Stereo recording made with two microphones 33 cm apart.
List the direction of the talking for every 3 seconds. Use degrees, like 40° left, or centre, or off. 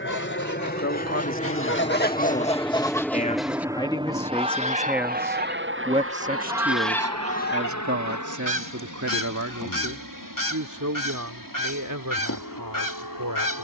40° left, 10° left, 40° right, 60° right, 70° right.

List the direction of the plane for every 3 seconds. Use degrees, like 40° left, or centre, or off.
20° left, 20° right, 50° right, 60° right, 70° right.